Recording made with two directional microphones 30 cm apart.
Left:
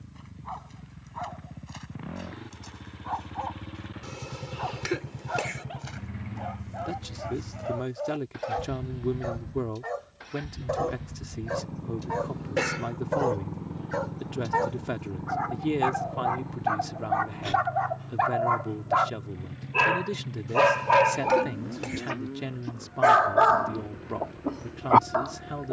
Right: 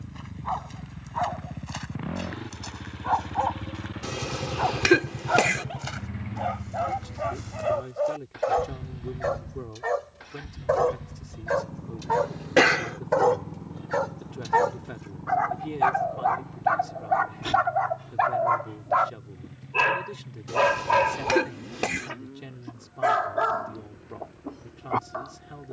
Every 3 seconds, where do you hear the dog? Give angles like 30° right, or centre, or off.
60° right, 50° right, 50° right, 40° right, 40° right, 20° right, centre, 30° left, 50° left.